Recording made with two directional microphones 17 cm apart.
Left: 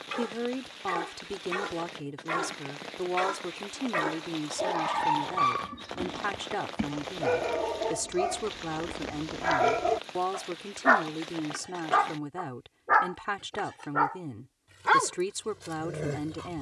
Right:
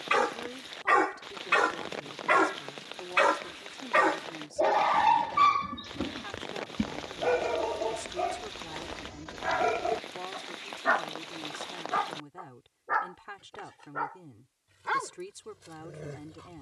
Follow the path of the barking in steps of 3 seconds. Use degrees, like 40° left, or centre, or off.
50° right, 30° right, centre, 20° left, 40° left, 50° left.